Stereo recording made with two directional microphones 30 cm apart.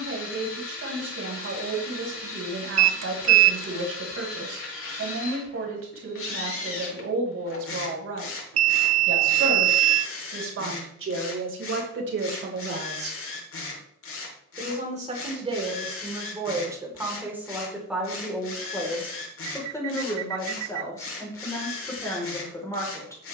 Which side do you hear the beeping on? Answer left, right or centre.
right.